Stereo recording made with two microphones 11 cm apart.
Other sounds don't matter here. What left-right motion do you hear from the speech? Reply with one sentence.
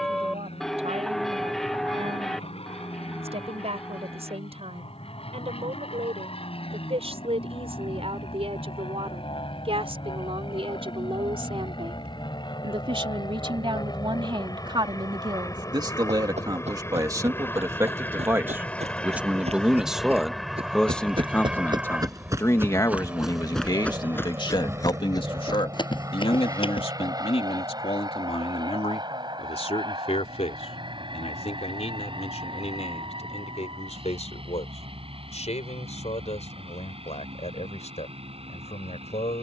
In this clip you hear the speech move from right to left.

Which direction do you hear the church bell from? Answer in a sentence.
In this clip you hear the church bell in the centre.